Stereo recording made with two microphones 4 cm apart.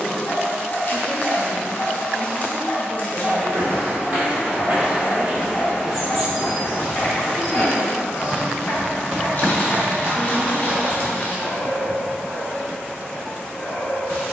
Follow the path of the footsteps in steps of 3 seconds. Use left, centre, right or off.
off, right, centre, right, off.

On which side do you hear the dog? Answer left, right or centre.
left.